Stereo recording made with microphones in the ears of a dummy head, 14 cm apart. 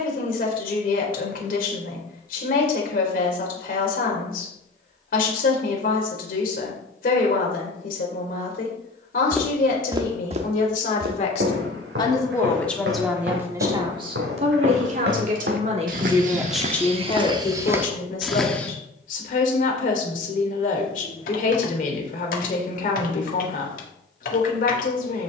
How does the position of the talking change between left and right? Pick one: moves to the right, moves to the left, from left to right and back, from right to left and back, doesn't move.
from left to right and back.